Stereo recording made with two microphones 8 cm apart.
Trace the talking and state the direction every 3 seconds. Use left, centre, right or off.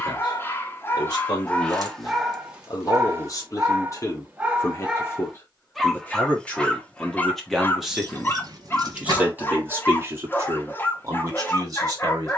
left, left, centre, right.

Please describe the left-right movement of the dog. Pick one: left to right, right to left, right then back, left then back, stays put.
right then back.